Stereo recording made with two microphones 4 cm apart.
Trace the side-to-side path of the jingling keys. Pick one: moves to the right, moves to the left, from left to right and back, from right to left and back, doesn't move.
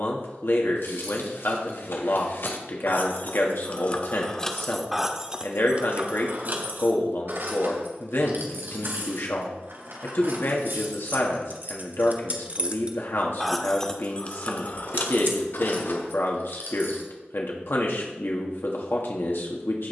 from left to right and back.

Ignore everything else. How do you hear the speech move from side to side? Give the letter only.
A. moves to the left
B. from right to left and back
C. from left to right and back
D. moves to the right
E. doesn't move
E.